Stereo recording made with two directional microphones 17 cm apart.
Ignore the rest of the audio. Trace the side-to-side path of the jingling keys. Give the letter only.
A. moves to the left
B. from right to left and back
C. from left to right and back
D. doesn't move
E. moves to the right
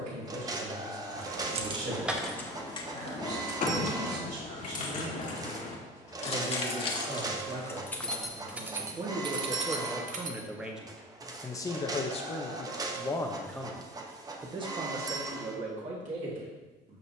B.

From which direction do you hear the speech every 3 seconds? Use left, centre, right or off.
right, right, right, centre, centre, right.